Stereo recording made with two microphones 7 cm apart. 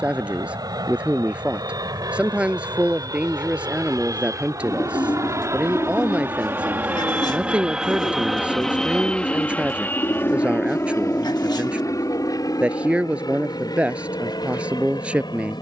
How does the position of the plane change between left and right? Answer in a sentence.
You can hear the plane move to the left.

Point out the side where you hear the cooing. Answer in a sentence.
You can hear the cooing on the left.